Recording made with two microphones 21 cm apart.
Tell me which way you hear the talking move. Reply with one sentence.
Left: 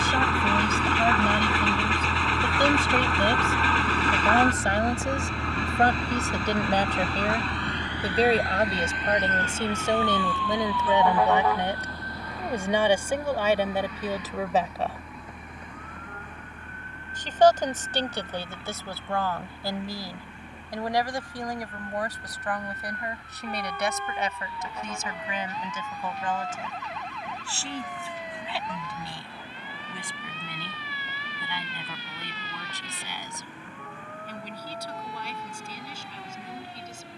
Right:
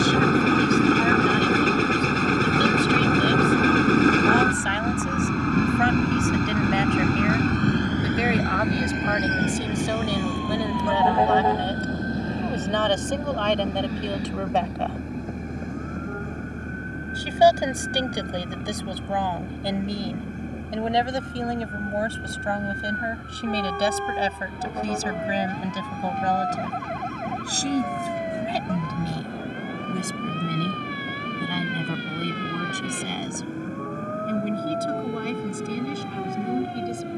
In this clip you hear the talking go from the left side to the right.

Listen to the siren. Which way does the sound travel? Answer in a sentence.
You can hear the siren travel towards the right.